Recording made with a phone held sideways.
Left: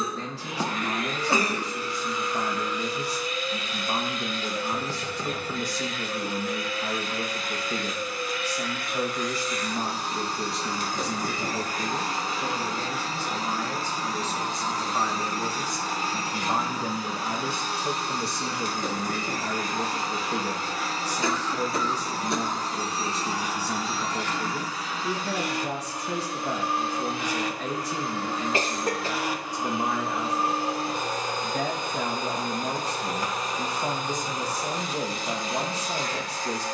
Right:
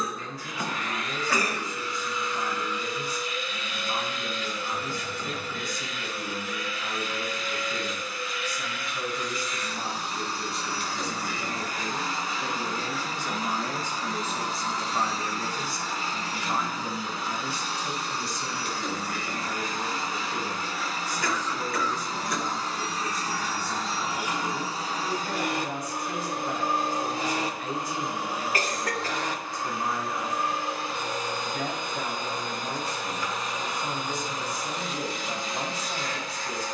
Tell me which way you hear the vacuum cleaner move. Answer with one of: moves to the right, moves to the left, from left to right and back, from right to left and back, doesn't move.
from left to right and back.